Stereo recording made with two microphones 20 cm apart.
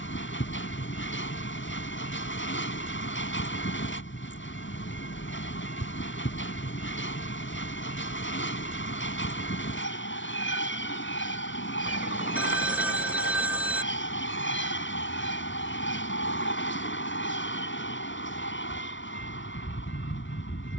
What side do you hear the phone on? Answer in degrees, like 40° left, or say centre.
10° right.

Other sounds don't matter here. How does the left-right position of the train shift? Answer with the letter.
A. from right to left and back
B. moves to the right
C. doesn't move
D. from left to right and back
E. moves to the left
C.